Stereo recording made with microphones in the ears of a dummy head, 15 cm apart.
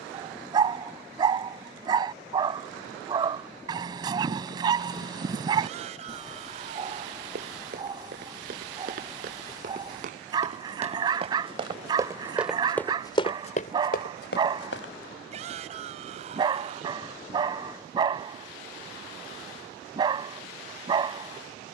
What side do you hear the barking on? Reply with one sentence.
In this clip you hear the barking on the right.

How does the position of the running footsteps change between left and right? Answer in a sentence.
In this clip you hear the running footsteps move from right to left.